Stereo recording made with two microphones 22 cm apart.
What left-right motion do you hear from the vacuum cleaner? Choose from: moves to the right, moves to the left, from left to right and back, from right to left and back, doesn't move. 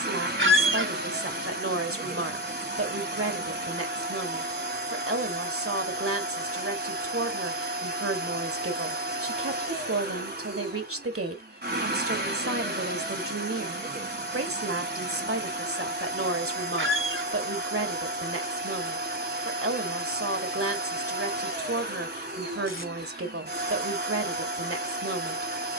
doesn't move.